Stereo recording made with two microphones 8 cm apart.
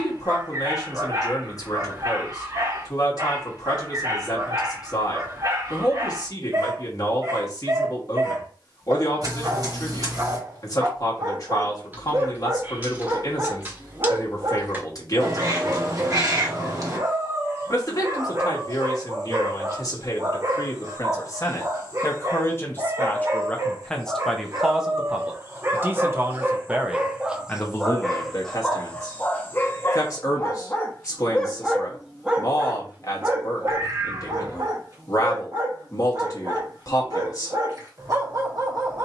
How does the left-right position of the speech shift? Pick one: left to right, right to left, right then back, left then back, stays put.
right then back.